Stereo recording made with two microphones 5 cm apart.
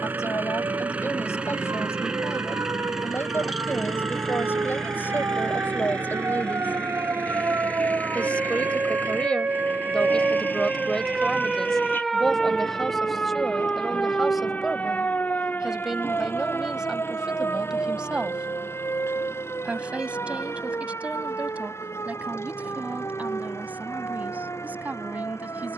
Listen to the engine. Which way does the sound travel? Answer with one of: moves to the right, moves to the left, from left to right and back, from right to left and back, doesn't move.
moves to the left.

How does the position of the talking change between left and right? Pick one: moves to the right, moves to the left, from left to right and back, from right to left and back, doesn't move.
moves to the right.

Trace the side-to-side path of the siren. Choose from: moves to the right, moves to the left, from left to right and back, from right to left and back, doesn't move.
moves to the left.